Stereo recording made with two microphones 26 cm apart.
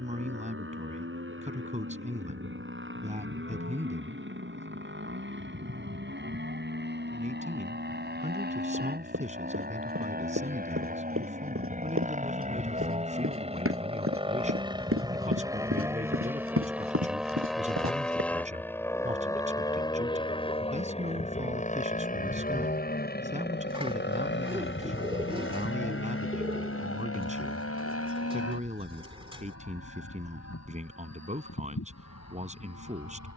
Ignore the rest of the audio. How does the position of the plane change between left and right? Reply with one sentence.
You can hear the plane travel towards the left.